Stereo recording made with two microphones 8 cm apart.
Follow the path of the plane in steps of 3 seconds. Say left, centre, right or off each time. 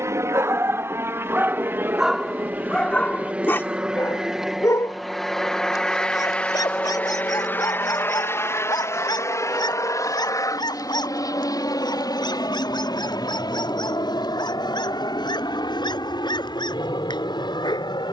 right, centre, left, left, left, left.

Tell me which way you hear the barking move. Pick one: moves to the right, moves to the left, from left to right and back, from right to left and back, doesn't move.
moves to the left.